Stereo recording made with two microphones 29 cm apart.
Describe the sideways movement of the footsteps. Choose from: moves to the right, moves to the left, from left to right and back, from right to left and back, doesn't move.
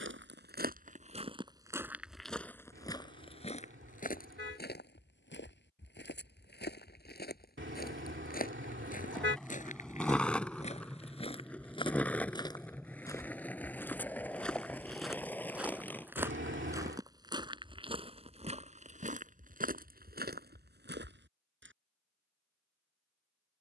from right to left and back.